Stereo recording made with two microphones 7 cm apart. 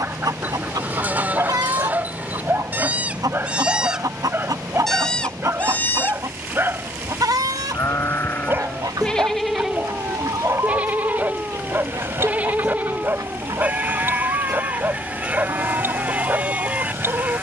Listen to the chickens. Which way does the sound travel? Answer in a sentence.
You can hear the chickens stay in one place.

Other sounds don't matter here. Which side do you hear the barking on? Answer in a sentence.
You can hear the barking on the right.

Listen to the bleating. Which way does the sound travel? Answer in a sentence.
In this clip you hear the bleating go left and come back.